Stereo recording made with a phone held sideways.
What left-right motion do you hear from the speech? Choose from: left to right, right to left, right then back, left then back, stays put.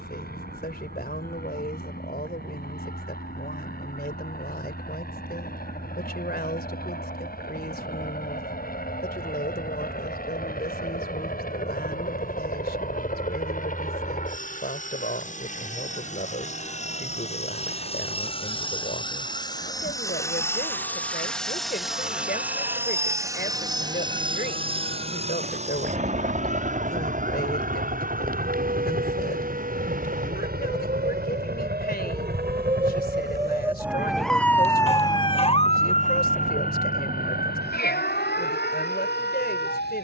stays put.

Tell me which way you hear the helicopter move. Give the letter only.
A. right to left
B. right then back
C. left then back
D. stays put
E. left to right
E.